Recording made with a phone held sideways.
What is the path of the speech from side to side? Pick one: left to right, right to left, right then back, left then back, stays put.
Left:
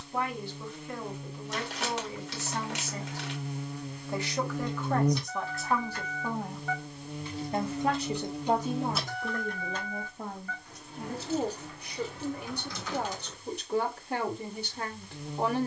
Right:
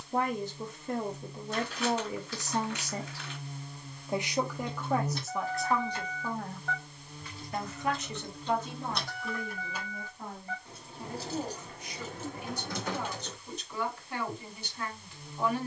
right to left.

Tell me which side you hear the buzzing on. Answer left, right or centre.
left.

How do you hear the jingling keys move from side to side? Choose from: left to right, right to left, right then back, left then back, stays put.
left then back.